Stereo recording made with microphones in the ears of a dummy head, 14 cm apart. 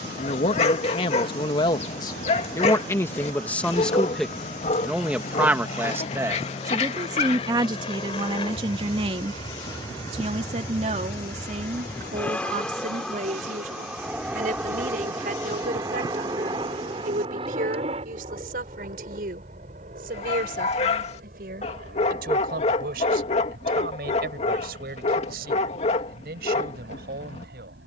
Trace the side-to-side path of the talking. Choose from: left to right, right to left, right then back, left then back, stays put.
left to right.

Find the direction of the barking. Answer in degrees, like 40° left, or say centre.
40° left.